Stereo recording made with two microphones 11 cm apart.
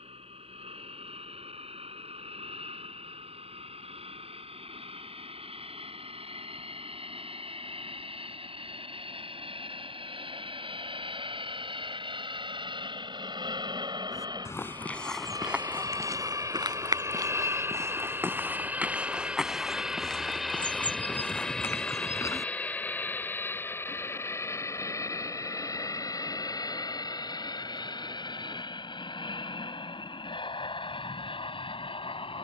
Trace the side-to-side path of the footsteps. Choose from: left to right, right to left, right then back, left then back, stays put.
right then back.